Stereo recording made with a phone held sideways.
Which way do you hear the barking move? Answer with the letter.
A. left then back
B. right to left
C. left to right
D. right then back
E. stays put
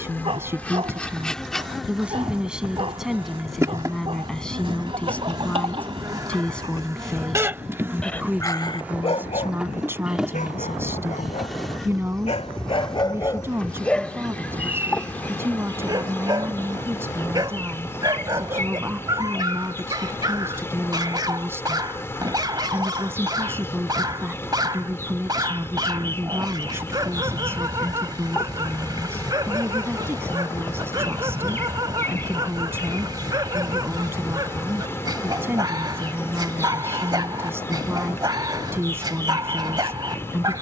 A.